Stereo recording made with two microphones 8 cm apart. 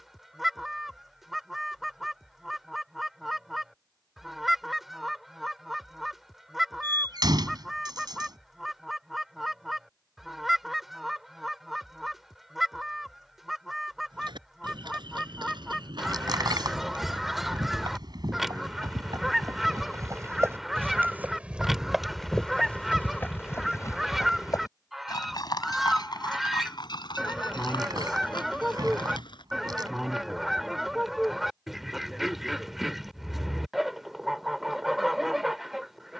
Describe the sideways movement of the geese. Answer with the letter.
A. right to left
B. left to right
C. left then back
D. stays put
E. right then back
D.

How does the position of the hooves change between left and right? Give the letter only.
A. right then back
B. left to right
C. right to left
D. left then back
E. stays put
C.